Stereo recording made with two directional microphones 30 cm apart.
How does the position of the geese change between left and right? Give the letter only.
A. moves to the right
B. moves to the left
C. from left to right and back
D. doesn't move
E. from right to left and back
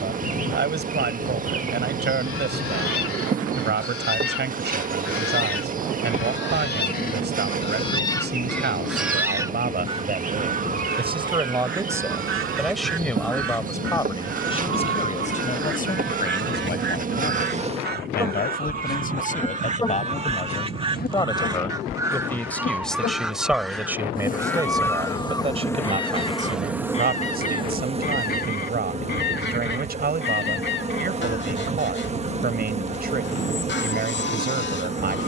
C.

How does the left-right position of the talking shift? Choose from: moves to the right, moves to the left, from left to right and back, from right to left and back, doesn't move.
from right to left and back.